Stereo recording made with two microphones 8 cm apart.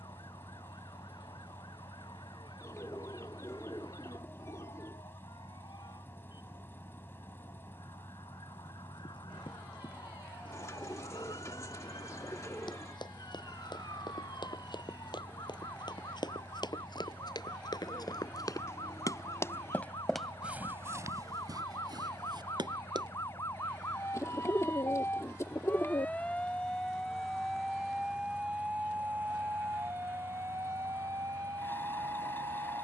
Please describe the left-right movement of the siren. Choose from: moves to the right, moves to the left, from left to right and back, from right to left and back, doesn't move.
moves to the right.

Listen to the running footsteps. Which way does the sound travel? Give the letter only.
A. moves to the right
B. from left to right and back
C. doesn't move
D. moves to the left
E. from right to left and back
A.